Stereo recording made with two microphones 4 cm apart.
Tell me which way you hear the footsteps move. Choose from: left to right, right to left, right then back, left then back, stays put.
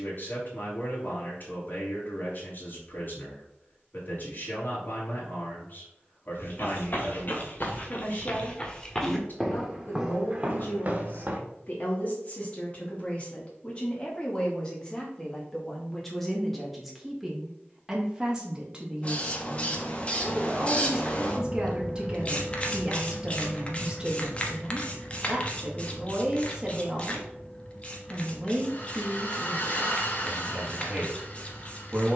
left to right.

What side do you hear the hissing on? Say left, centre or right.
left.